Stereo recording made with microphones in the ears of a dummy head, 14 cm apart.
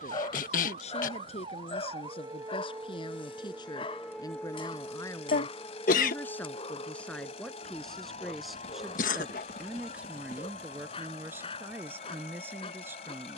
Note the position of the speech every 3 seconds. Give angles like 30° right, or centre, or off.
40° left, 30° left, 10° left, 10° right, 20° right.